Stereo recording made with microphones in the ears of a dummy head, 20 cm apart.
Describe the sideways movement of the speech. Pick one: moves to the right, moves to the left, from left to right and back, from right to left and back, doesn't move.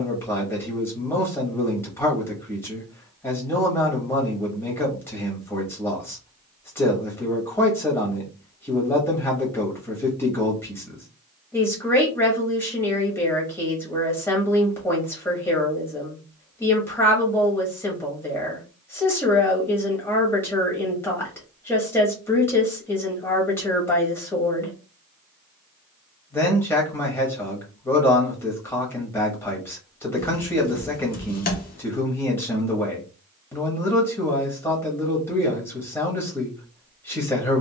doesn't move.